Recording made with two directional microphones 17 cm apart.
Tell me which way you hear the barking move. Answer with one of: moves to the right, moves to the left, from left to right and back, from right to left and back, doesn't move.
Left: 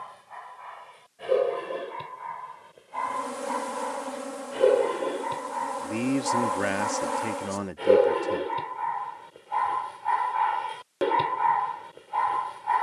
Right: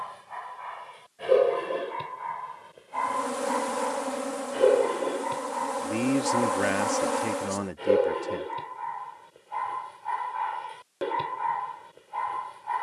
moves to the left.